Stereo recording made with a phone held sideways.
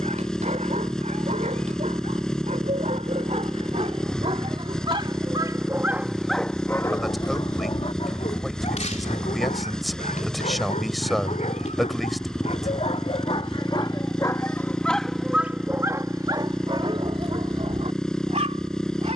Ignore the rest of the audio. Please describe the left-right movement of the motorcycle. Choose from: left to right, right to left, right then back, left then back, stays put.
stays put.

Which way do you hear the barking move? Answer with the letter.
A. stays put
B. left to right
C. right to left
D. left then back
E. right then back
D.